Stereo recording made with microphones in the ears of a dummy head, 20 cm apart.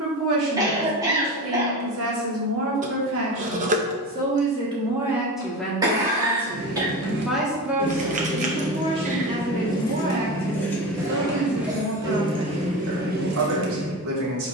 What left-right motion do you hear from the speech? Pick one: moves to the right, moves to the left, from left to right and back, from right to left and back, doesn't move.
from right to left and back.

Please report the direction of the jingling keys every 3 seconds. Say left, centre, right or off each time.
off, off, right, centre, right.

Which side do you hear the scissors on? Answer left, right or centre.
right.